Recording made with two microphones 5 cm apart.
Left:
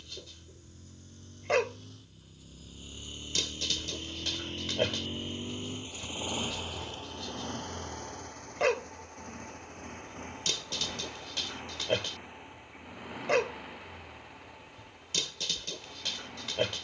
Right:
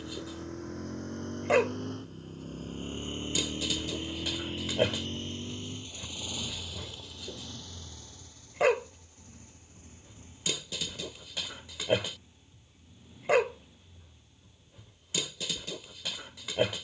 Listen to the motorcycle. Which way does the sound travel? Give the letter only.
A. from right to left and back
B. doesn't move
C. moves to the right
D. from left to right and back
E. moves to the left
E.